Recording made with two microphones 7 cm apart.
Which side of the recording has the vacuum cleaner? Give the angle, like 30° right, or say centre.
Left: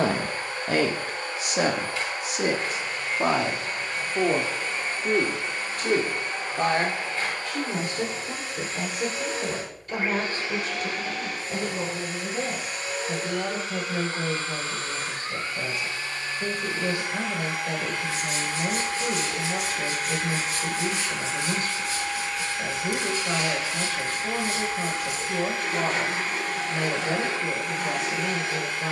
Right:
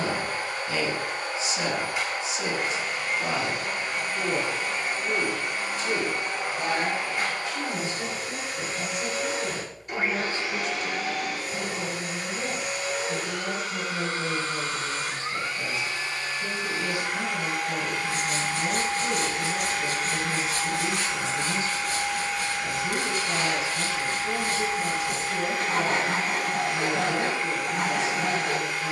20° right.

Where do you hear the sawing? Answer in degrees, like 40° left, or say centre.
60° right.